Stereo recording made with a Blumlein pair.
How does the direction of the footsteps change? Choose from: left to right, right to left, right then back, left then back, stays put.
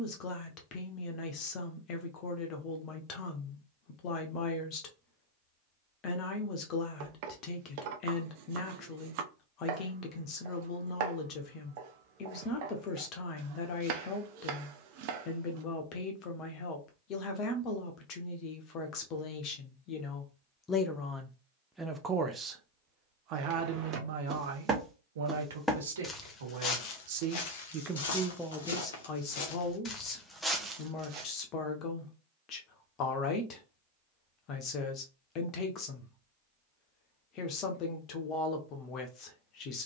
left then back.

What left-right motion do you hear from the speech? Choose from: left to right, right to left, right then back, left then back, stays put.
right then back.